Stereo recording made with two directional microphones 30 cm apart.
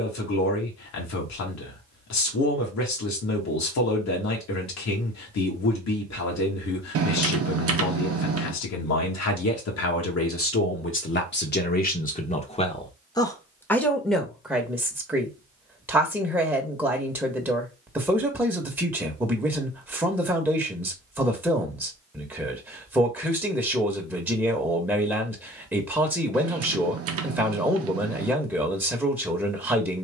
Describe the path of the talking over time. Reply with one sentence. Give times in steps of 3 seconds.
You can hear the talking on the left from 0 s and in the centre from 12 s.